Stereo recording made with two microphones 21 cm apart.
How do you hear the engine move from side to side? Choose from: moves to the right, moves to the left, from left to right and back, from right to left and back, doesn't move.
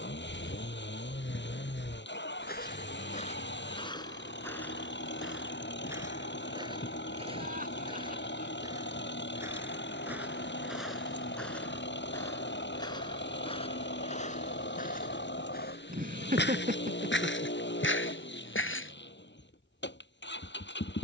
doesn't move.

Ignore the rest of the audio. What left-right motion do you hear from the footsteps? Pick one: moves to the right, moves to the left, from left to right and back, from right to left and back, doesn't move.
from left to right and back.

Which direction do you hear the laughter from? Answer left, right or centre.
right.